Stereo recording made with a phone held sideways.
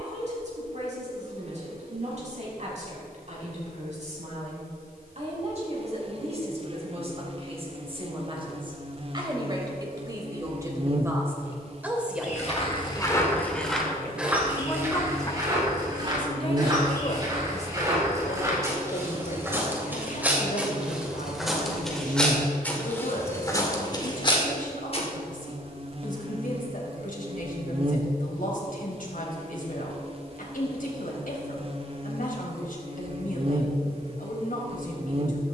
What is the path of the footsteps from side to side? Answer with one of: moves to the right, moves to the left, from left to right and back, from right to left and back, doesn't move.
from left to right and back.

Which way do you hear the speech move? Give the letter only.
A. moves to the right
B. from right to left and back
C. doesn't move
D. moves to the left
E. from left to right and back
D.